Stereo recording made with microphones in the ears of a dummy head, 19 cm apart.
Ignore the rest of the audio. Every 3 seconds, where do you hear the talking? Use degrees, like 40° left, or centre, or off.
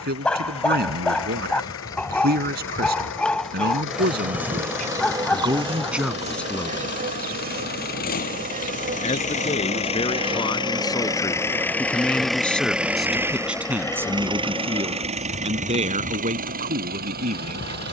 50° right, 40° right, 10° left, 20° left, 10° right, 40° right.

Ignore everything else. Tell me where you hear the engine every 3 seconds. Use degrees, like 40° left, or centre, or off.
70° left, 60° left, 50° left, 20° left, 10° right, 40° right.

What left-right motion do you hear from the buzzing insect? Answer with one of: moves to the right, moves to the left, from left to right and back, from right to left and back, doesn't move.
from left to right and back.